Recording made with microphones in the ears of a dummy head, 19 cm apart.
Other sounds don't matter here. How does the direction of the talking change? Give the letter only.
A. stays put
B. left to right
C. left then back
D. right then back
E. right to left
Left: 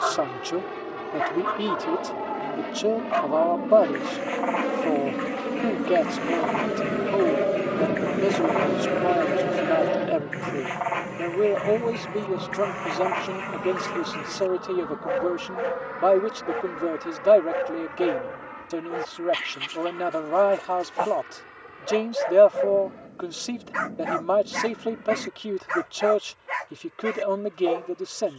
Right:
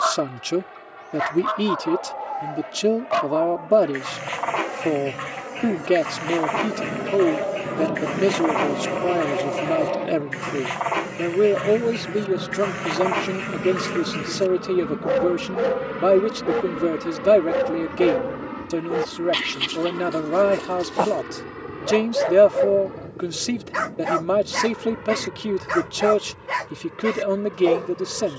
A.